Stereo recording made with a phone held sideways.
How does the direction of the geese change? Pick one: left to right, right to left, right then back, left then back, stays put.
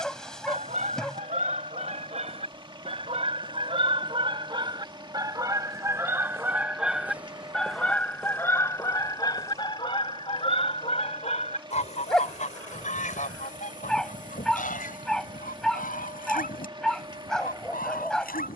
right to left.